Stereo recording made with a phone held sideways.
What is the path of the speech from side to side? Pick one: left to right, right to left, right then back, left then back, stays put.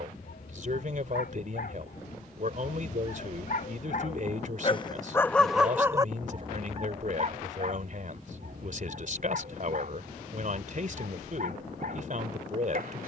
stays put.